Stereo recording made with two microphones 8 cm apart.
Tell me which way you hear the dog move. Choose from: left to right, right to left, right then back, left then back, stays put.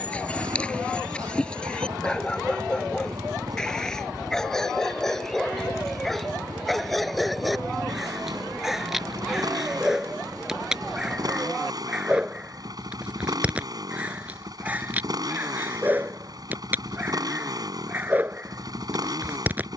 left to right.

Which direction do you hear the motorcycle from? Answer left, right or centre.
right.